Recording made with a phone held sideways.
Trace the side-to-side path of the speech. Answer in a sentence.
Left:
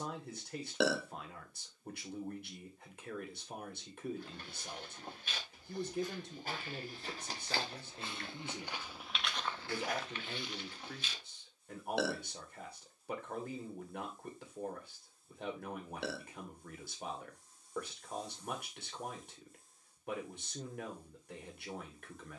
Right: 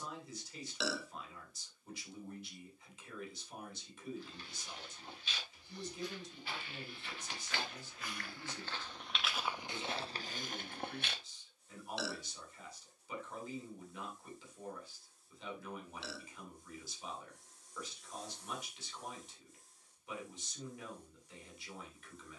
You can hear the speech stay in one place.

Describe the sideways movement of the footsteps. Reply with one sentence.
In this clip you hear the footsteps move to the right.